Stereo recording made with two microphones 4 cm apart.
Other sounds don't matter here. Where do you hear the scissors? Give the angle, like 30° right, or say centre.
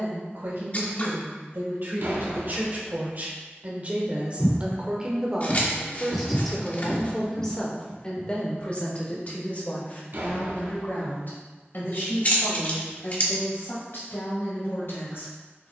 40° left.